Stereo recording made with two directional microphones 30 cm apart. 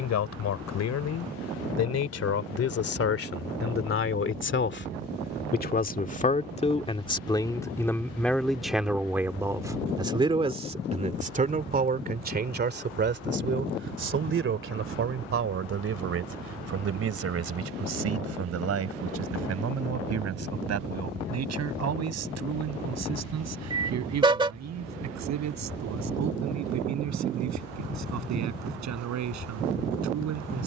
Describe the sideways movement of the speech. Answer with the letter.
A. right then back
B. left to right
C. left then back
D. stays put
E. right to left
B.